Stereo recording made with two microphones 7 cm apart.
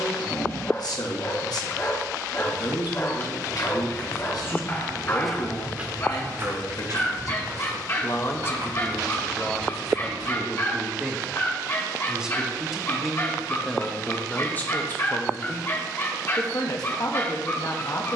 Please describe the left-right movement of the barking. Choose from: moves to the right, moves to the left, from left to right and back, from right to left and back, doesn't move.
doesn't move.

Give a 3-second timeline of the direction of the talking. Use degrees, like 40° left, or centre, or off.
60° left, 60° left, 40° left, centre, 10° left, 50° left.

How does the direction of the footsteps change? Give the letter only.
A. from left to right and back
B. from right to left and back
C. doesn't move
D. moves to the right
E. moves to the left
D.